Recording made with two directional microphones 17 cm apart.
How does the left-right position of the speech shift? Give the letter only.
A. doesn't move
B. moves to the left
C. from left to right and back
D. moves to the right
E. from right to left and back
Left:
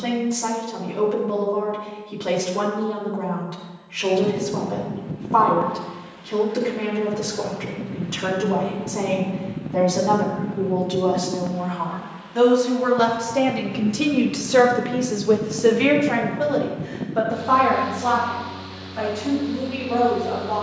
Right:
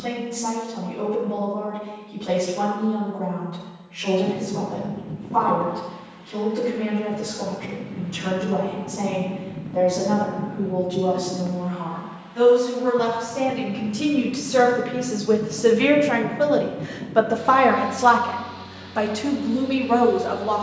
D.